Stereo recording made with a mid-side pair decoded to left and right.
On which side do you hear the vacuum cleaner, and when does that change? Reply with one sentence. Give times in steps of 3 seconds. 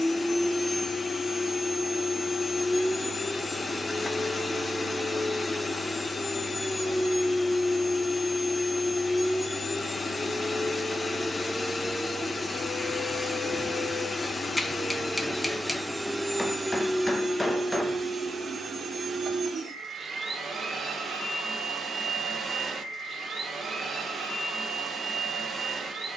In this clip you hear the vacuum cleaner on the left from 0 s, in the centre from 15 s and on the right from 18 s.